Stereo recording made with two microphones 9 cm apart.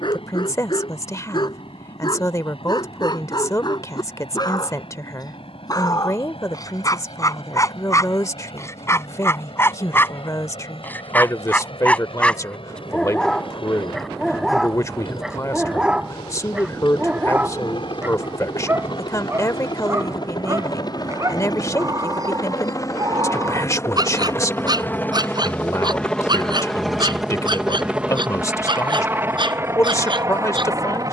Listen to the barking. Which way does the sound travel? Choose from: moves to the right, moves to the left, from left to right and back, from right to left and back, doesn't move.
moves to the right.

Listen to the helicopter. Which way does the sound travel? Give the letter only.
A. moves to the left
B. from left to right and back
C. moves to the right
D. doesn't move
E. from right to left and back
C.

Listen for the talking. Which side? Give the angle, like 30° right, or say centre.
30° left.